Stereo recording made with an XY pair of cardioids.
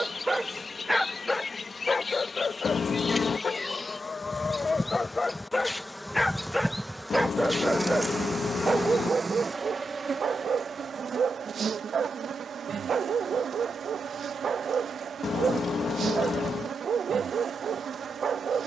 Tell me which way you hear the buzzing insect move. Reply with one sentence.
In this clip you hear the buzzing insect travel towards the right.